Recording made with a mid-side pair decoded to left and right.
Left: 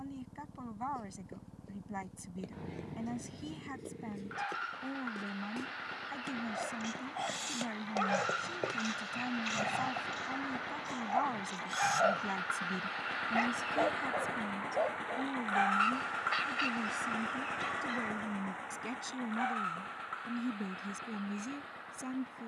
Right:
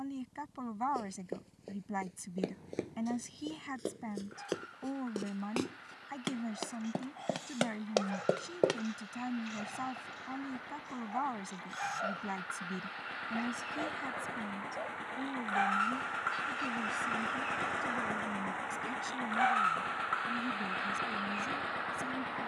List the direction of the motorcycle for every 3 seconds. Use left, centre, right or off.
left, left, left, left, left, centre, right, right.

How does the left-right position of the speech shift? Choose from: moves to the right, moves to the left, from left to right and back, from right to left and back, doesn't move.
moves to the left.